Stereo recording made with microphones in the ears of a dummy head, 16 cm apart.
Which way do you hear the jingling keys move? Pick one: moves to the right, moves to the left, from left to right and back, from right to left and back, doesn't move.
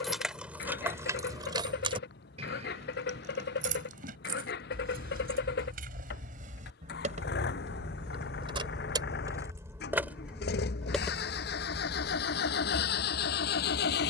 from left to right and back.